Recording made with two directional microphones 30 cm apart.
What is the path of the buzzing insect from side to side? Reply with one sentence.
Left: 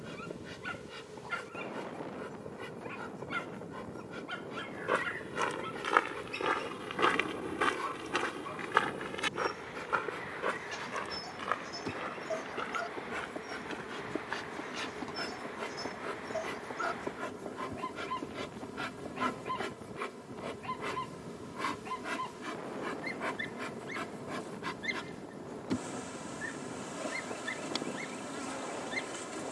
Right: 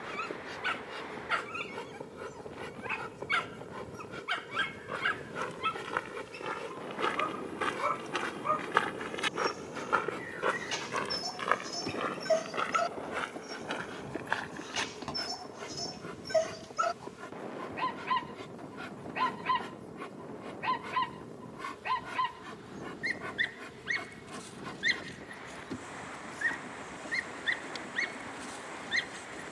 In this clip you hear the buzzing insect travel towards the left.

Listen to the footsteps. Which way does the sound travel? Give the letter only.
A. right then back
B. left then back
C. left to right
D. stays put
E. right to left
C.